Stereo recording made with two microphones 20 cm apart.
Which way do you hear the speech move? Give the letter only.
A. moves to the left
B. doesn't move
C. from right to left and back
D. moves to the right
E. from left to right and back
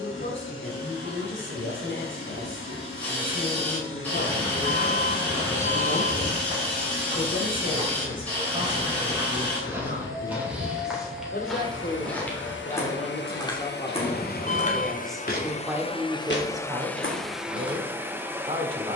D.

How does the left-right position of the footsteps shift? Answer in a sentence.
In this clip you hear the footsteps go from the right side to the left.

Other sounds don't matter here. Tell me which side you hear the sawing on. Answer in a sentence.
In this clip you hear the sawing in the centre.